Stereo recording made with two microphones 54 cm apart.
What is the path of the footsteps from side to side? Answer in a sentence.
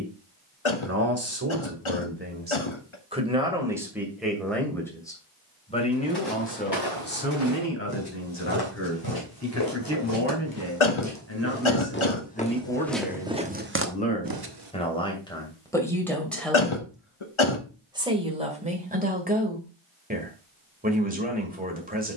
In this clip you hear the footsteps move from left to right.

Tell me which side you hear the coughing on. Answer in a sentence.
In this clip you hear the coughing on the left.